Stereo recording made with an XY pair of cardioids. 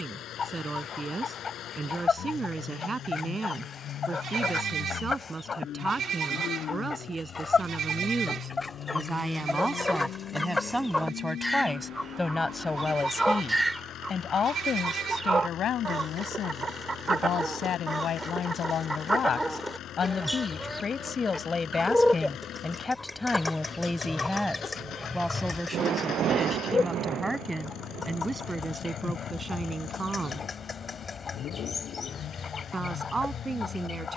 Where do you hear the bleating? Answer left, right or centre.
right.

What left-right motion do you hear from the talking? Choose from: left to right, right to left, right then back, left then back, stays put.
left then back.